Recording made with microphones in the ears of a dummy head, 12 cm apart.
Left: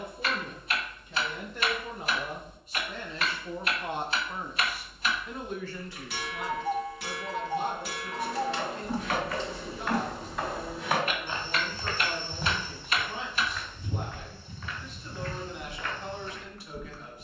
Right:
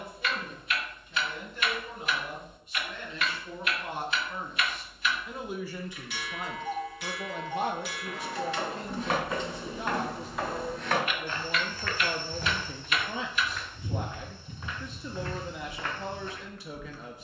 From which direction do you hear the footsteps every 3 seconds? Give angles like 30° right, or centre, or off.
off, off, 30° right, centre, centre, 30° right.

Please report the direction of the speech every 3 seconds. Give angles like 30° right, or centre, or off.
40° left, 10° left, 50° right, 70° right, 70° right, 70° right.